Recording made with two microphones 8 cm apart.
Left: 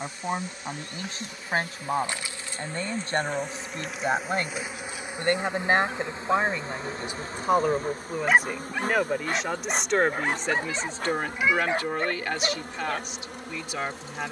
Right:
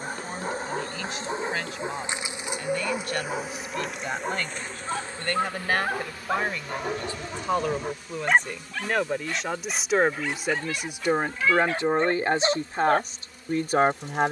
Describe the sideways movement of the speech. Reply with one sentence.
You can hear the speech go from the left side to the right.